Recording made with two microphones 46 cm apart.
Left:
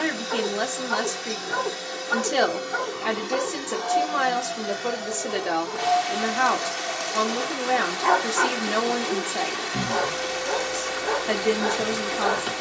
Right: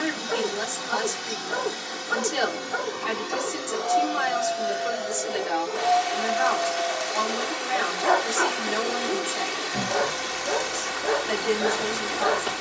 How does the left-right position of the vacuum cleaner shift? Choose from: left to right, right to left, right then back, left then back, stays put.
left then back.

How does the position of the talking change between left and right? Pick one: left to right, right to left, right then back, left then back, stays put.
stays put.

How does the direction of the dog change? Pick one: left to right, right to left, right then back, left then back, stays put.
stays put.